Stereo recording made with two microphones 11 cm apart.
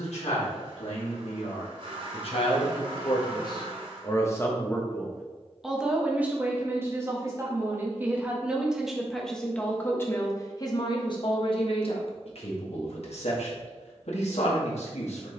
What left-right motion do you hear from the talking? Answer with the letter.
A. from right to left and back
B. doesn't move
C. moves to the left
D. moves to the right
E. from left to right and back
E.